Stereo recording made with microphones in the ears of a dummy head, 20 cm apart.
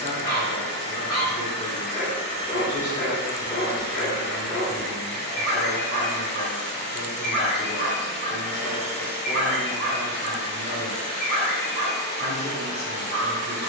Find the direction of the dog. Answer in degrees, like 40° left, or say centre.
20° left.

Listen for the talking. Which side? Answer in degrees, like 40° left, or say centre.
30° left.